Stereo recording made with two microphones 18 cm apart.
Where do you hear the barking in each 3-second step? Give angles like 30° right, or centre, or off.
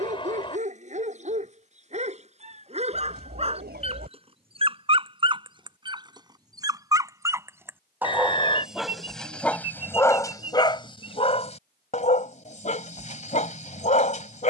40° right, 30° right, 10° right, 20° left, 40° left.